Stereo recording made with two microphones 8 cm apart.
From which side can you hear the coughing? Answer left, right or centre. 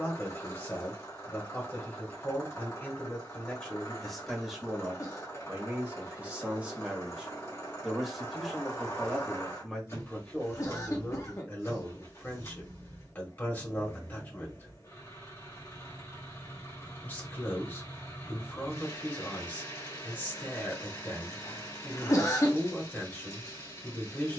left.